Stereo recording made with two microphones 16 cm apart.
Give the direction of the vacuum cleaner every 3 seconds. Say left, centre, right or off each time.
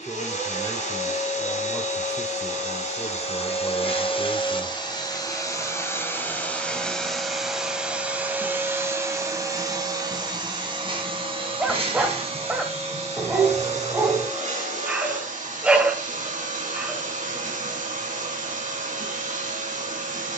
left, left, centre, right, right, right, right.